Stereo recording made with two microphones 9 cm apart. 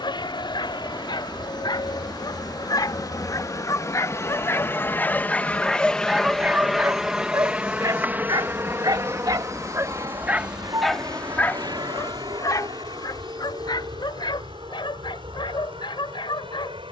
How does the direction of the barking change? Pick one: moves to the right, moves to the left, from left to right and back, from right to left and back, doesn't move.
from left to right and back.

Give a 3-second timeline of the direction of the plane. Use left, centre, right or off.
left, left, centre, right, right, right.